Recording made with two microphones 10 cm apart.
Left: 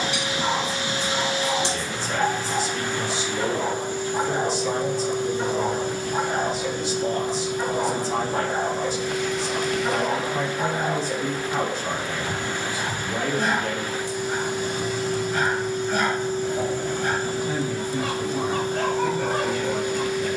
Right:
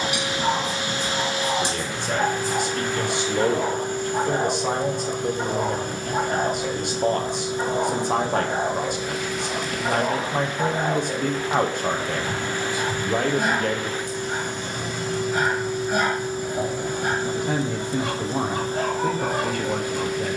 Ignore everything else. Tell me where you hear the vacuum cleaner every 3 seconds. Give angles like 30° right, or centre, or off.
50° right, 50° right, 30° right, centre, 10° left, 10° right, 40° right.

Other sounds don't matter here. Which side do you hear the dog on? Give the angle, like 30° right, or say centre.
10° right.